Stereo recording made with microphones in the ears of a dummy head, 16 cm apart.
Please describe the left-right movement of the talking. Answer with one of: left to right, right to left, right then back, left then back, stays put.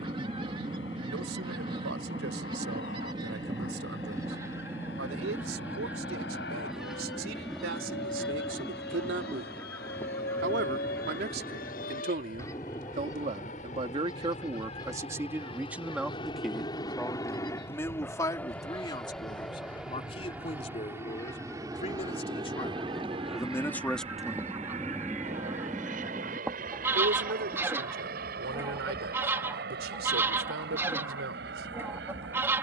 left then back.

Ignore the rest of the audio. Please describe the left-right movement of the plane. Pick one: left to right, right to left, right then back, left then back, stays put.
left to right.